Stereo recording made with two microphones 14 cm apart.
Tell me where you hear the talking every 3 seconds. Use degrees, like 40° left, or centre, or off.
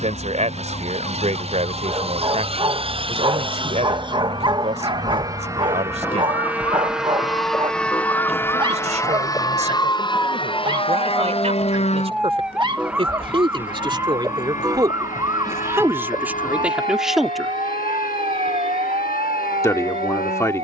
60° right, 60° right, 60° right, 50° right, 40° right, 10° right, 20° left.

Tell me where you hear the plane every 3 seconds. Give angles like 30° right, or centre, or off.
50° right, 30° right, centre, 40° left, 60° left, 70° left, 70° left.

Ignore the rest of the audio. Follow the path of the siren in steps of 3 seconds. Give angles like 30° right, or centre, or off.
50° left, 40° left, 30° left, 10° left, 10° right, 30° right, 50° right.